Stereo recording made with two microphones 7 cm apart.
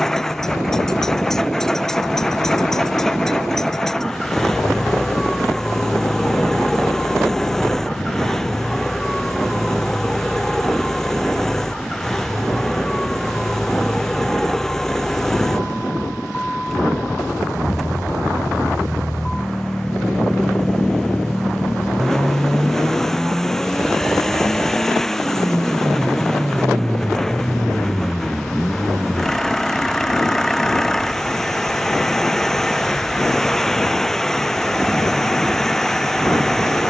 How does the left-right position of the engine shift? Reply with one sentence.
In this clip you hear the engine stay in one place.